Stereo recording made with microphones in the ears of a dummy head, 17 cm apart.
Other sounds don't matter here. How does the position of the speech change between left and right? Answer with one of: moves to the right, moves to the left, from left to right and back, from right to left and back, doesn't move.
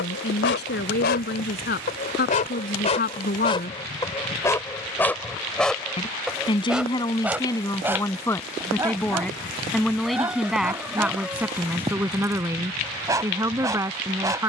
moves to the right.